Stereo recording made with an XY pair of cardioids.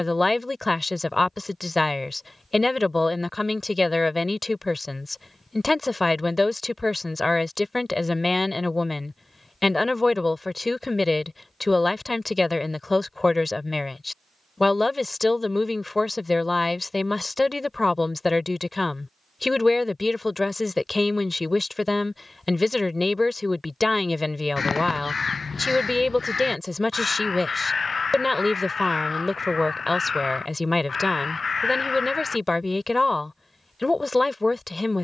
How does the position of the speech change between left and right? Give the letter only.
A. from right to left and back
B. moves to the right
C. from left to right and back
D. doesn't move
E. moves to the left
D.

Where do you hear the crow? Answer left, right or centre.
left.